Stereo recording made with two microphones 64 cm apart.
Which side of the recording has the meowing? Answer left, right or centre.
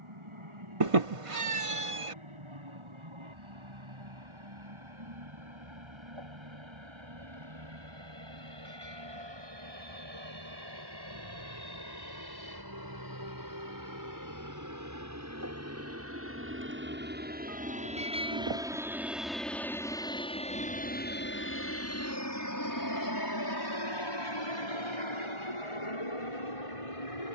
right.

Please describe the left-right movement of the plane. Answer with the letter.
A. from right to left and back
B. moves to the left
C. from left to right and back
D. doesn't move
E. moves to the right
B.